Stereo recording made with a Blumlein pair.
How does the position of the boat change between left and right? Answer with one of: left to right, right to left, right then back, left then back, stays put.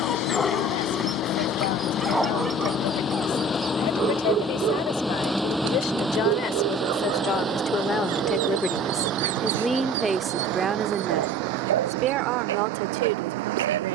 left to right.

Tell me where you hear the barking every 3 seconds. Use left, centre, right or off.
centre, right, right, right, right.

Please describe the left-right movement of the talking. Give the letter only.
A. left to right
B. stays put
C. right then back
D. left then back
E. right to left
A.